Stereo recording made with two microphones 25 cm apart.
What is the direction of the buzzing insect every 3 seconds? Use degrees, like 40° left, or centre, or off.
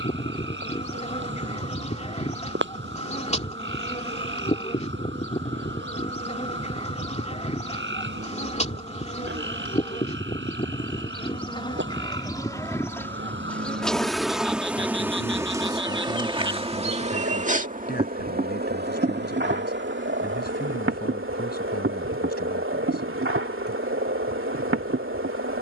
30° left, 30° left, 30° left, 20° left, 10° left, 20° right, 50° right, 60° right, 60° right.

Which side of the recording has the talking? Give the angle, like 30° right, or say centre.
40° left.